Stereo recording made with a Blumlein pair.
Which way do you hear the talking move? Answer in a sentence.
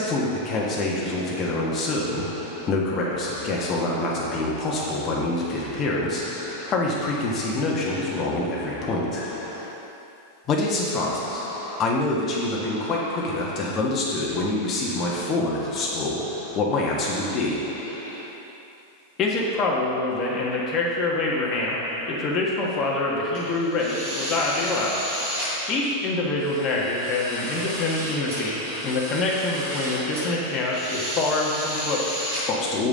In this clip you hear the talking stay in one place.